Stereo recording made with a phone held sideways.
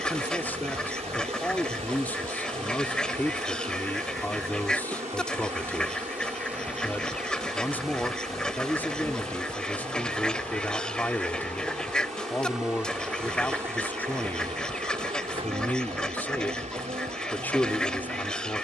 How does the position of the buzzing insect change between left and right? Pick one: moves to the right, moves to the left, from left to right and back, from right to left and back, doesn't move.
from right to left and back.